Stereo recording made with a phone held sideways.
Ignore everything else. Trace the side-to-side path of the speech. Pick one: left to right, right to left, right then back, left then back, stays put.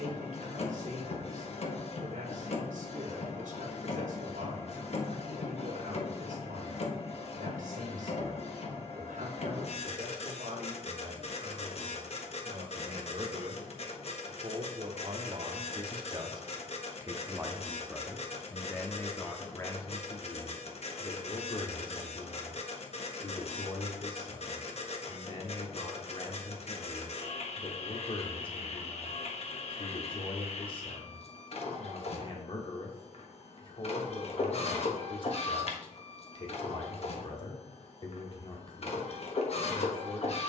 right to left.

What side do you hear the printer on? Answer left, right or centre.
left.